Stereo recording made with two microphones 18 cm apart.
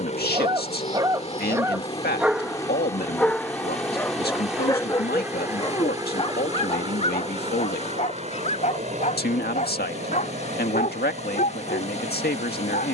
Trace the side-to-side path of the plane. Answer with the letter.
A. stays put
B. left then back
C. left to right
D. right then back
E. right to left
C.